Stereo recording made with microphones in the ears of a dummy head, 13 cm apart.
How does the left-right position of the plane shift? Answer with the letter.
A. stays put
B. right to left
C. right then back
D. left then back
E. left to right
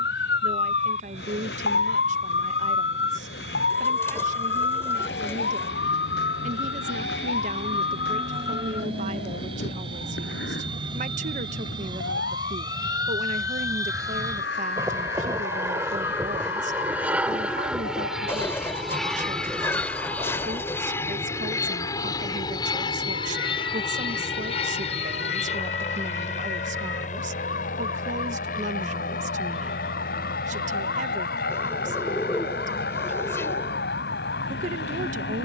B.